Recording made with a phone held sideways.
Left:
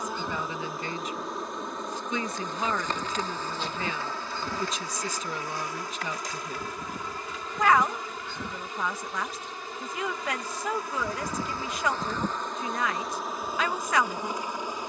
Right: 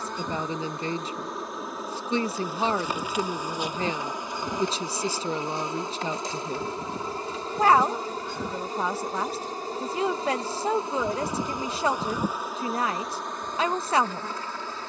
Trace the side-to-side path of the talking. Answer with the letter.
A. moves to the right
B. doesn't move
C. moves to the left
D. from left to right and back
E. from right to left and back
B.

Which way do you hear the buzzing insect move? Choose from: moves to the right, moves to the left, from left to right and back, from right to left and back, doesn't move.
from left to right and back.